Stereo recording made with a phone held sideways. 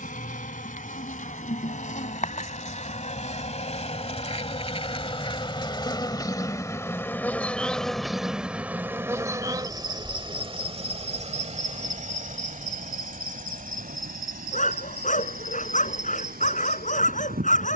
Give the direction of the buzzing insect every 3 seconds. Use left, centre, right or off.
left, left, centre, right, right, right.